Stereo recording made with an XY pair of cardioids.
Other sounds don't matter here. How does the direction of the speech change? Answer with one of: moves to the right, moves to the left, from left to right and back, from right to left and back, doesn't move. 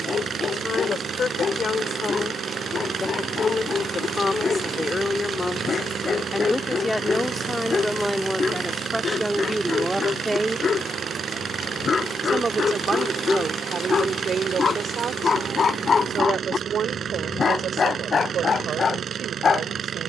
moves to the right.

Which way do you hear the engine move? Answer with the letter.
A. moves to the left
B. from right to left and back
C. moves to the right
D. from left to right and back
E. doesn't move
E.